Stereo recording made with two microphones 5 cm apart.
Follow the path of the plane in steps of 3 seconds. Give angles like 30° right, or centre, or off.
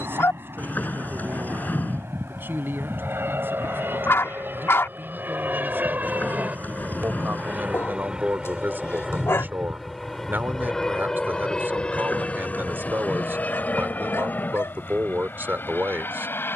70° right, 50° right, 20° right, 10° left, 30° left, 40° left.